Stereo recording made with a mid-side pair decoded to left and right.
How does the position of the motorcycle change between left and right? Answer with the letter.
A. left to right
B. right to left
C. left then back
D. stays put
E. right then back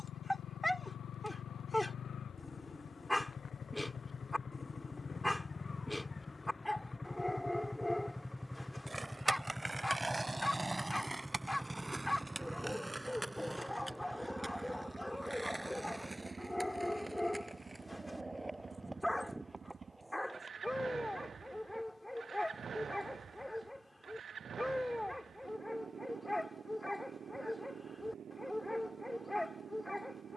A.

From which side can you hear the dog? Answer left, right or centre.
centre.